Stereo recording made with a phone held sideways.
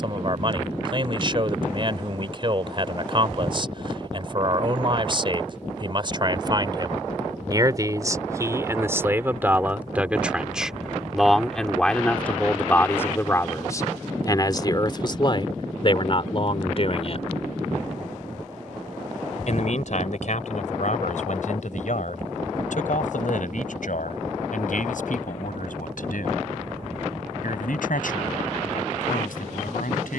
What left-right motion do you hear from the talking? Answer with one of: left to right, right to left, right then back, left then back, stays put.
right to left.